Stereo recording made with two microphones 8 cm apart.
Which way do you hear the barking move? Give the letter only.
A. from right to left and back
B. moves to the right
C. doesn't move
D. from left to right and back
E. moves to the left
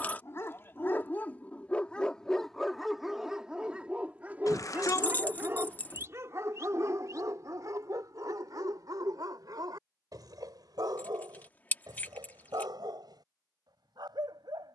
B.